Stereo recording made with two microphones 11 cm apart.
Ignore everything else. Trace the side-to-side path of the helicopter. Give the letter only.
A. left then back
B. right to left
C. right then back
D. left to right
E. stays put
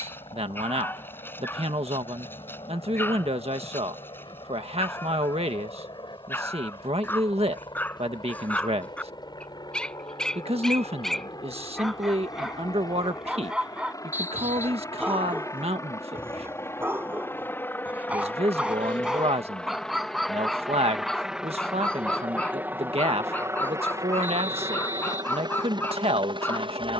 D.